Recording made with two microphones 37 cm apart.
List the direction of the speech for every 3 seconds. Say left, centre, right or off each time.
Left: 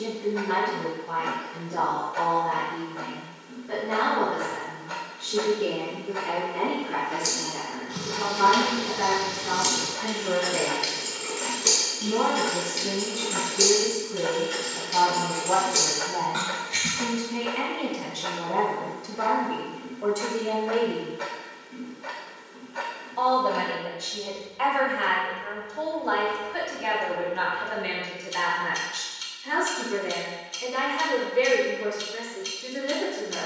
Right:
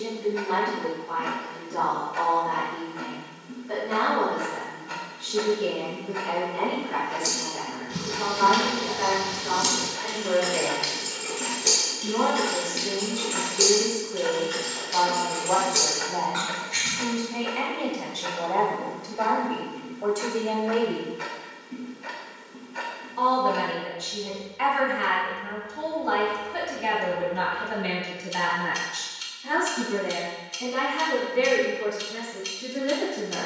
left, left, left, left, left, left, centre, right, right, right, right.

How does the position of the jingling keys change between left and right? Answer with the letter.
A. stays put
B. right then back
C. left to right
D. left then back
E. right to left
E.